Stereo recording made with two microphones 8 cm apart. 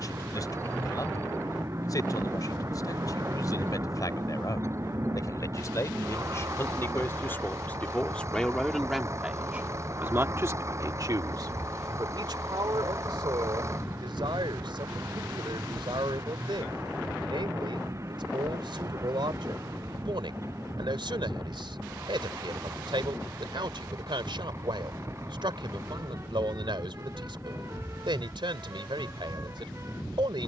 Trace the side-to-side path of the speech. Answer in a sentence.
In this clip you hear the speech go from the left side to the right.